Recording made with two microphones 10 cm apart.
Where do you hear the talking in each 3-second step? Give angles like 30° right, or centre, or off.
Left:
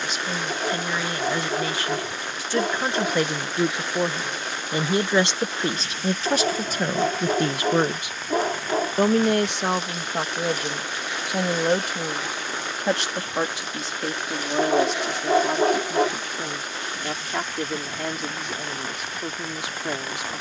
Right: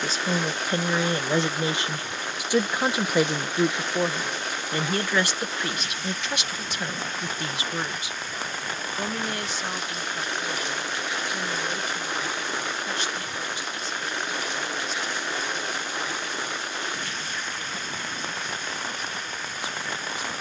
20° right, 10° left, 50° left, 70° left, 80° left, 80° left, 80° left.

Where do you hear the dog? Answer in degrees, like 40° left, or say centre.
80° left.